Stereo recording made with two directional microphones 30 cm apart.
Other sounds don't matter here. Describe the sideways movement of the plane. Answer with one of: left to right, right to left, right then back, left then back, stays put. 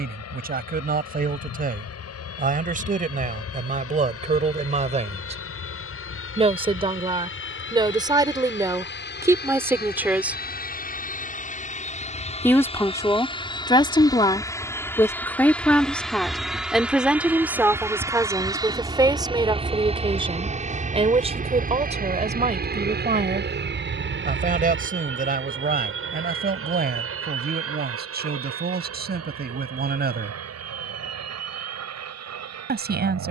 left to right.